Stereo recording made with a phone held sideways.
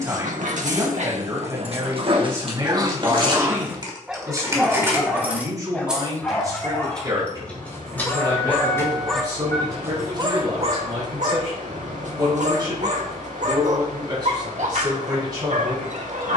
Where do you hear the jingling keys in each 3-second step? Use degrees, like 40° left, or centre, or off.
50° right, 20° right, 10° left, 20° left, off, off.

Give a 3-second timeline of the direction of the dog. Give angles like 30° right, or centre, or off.
50° right, centre, 20° left, 40° right, 60° right, 60° right.